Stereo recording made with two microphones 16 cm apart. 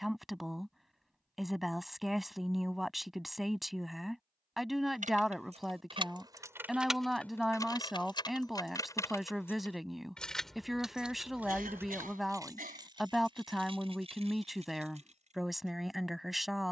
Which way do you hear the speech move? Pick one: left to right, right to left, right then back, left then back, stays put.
stays put.